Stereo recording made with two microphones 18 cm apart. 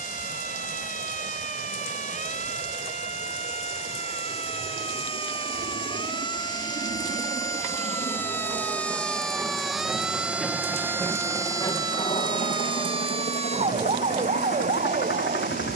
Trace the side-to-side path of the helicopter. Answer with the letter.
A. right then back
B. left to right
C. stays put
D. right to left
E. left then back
D.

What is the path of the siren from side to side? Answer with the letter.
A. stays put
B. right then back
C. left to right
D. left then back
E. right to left
C.